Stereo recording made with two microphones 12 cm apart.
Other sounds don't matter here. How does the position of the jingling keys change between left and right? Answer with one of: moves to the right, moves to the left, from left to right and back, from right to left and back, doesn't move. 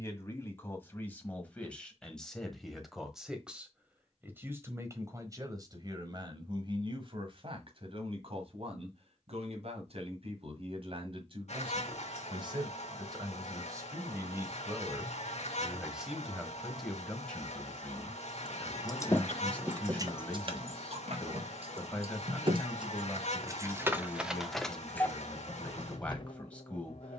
from left to right and back.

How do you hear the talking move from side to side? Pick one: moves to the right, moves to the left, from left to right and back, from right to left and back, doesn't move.
from left to right and back.